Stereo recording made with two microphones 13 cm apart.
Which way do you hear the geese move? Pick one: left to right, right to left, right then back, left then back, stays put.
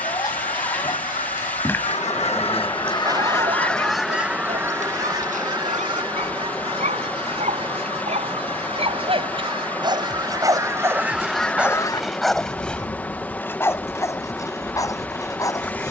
right then back.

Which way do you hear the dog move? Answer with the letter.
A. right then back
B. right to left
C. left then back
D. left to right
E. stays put
A.